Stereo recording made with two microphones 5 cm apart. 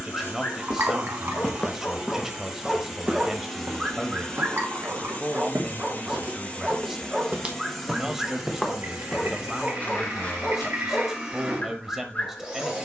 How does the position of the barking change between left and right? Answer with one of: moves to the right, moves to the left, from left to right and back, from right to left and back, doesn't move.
from left to right and back.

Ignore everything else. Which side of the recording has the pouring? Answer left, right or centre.
right.